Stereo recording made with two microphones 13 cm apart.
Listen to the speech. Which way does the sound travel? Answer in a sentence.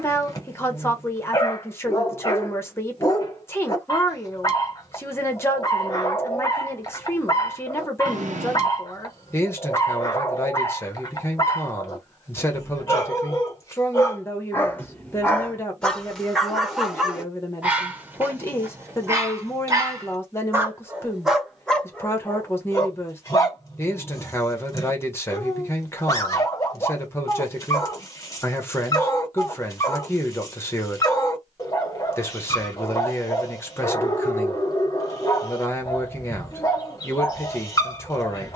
In this clip you hear the speech stay put.